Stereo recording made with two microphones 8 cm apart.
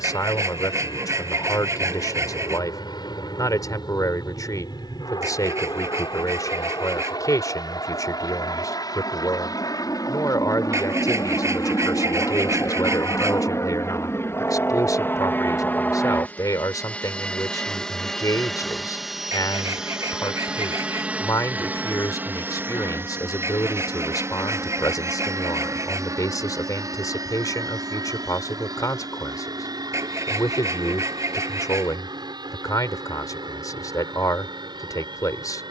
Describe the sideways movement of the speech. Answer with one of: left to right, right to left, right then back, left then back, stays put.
stays put.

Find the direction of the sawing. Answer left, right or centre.
right.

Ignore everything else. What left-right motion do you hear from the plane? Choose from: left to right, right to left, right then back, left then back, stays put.
left to right.